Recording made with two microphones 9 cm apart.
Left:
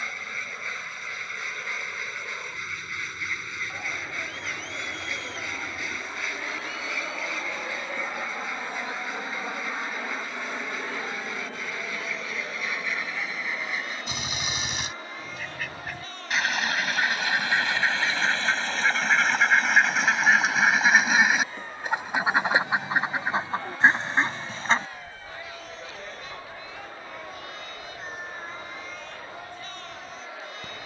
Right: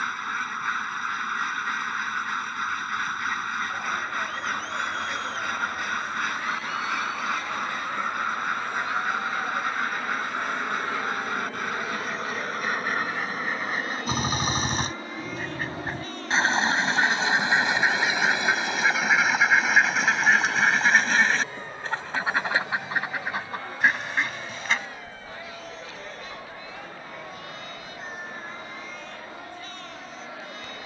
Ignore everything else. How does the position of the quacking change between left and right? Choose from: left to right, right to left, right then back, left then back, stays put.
right to left.